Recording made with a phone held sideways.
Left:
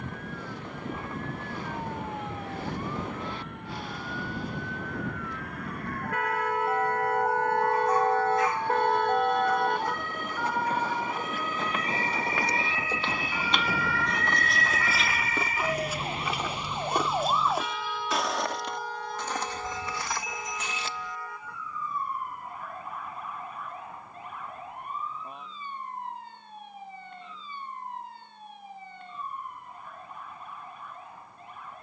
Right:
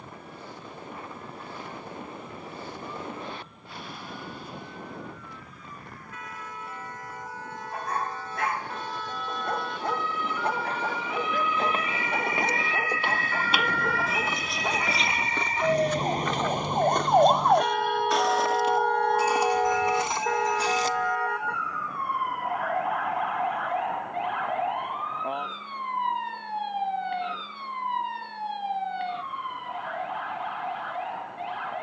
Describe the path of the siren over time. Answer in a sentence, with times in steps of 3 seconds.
You can hear the siren on the left from 0 s, in the centre from 12 s and on the right from 15 s.